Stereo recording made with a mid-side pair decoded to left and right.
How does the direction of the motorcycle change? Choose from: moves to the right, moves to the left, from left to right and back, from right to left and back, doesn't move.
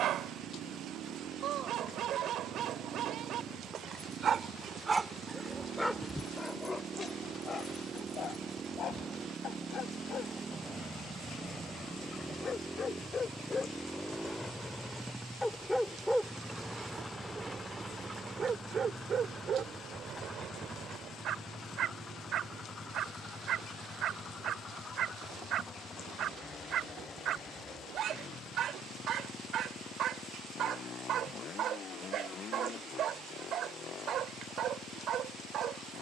moves to the left.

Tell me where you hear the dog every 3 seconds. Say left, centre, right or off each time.
right, right, left, left, left, centre, right, right, right, right, right, right.